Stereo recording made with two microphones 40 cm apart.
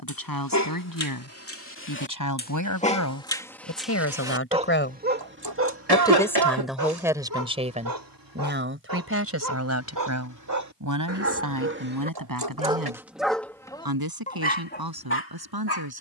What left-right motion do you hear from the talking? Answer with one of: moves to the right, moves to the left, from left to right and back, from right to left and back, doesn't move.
moves to the right.